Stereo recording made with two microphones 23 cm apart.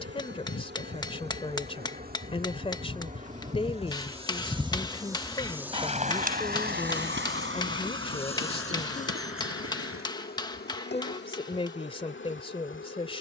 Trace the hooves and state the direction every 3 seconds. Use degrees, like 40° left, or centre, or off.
50° left, 10° left, 60° right, 70° right, off.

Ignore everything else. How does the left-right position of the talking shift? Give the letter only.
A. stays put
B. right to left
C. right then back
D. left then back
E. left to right
A.